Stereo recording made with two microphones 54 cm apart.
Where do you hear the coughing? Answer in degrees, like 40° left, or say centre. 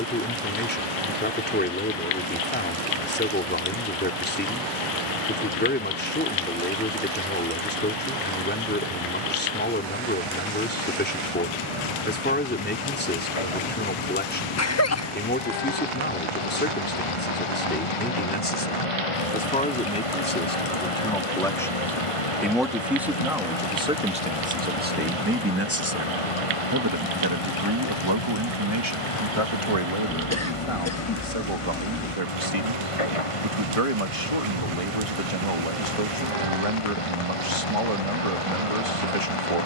30° left.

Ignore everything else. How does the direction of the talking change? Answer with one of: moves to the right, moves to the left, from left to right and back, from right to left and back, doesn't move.
moves to the right.